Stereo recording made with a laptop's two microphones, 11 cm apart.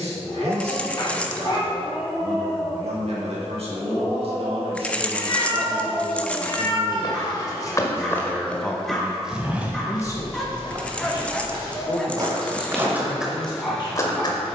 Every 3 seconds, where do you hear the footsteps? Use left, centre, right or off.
off, off, left, right, centre.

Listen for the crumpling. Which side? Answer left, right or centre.
centre.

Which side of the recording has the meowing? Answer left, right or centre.
left.